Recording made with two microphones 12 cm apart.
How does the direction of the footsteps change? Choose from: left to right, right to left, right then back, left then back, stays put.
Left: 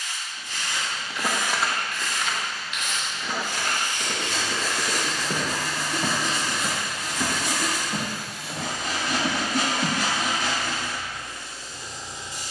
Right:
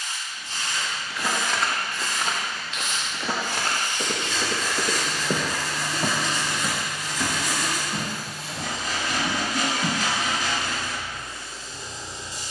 right then back.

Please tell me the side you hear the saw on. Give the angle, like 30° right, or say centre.
70° left.